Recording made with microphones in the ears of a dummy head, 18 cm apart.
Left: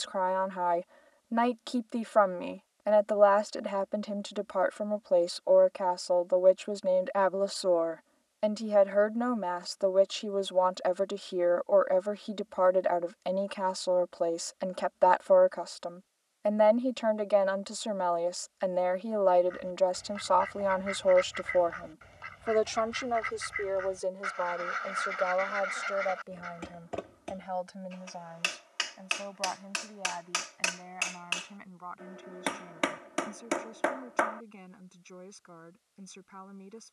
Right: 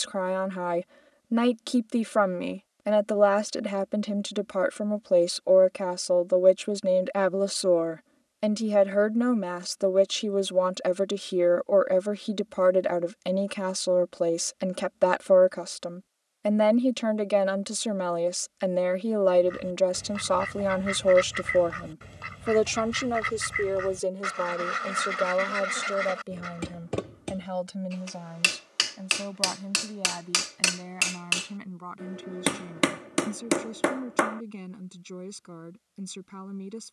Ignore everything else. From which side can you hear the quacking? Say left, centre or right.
right.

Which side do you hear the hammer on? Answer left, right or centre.
right.